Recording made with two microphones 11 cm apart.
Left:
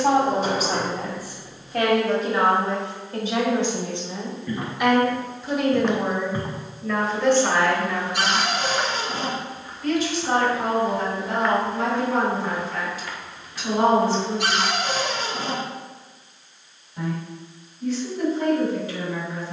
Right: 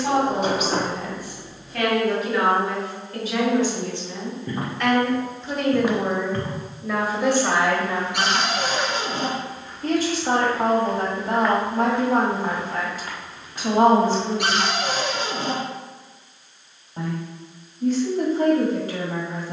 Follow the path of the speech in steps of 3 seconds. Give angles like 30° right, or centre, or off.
40° left, 20° left, 10° right, 50° right, 50° right, 50° right, 50° right.